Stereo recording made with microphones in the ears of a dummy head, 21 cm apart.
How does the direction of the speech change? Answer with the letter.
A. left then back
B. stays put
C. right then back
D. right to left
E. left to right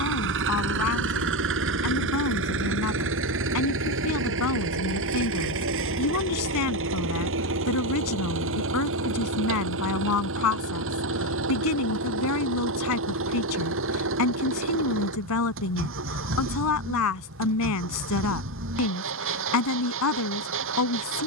B.